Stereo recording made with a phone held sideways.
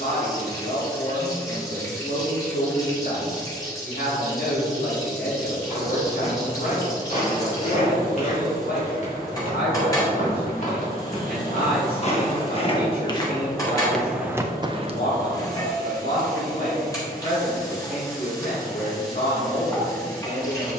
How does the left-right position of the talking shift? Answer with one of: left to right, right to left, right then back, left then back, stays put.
stays put.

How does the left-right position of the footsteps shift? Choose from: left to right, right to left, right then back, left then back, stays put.
left to right.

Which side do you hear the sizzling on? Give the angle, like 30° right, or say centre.
20° left.